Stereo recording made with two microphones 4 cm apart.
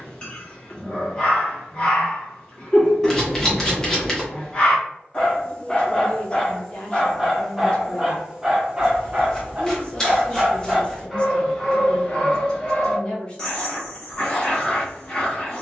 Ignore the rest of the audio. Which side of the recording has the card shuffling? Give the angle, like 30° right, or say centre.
10° left.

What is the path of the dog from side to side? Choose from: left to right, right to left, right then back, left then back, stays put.
right then back.